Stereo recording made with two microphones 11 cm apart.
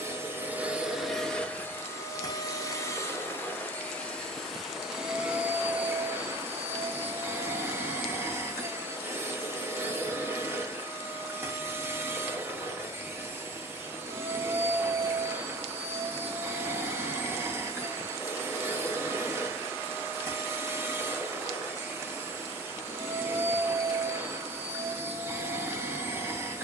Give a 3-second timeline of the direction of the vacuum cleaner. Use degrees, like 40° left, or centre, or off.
10° left, centre, 20° right, 20° right, 20° right, 20° right, 20° right, 20° right, 20° right.